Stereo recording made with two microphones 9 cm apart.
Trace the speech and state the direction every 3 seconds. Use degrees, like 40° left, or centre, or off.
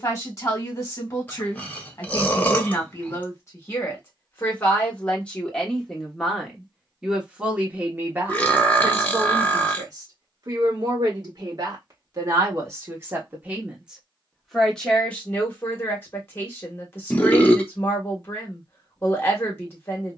30° left, 20° left, 10° right, 40° right, 20° right, 20° left, 30° left.